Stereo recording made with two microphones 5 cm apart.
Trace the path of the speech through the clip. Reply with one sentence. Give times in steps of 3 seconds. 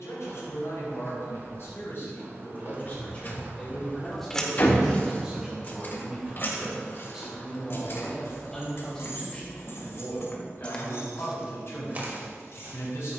In this clip you hear the speech on the left from 0 s, in the centre from 3 s and on the left from 9 s.